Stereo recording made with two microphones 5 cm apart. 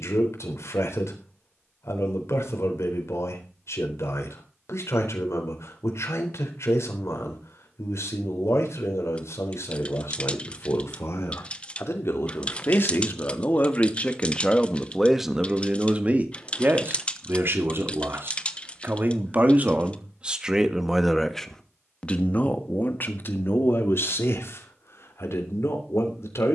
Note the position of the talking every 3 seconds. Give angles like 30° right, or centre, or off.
70° left, 70° left, 70° left, 70° left, 40° left, 40° right, 30° right, 30° left, 60° left.